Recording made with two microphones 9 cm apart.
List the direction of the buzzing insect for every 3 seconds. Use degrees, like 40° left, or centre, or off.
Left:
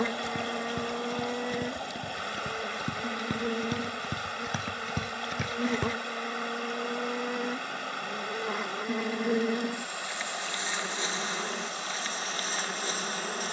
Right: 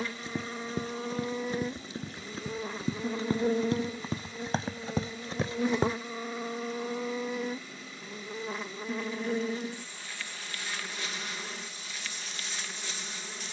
centre, 20° right, centre, 20° left, 40° left.